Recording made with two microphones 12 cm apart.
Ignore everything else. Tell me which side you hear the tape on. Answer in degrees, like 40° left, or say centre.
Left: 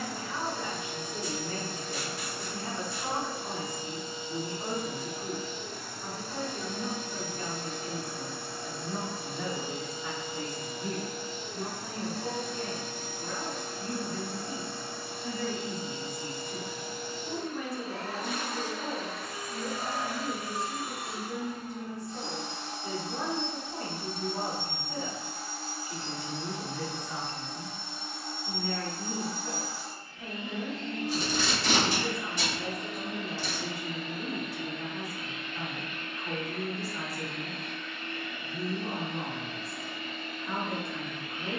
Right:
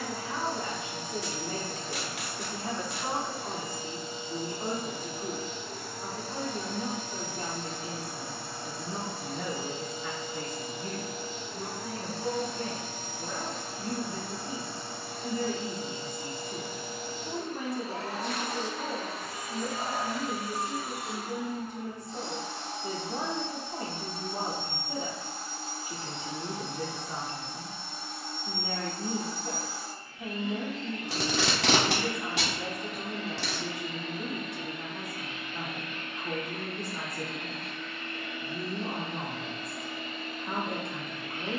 80° right.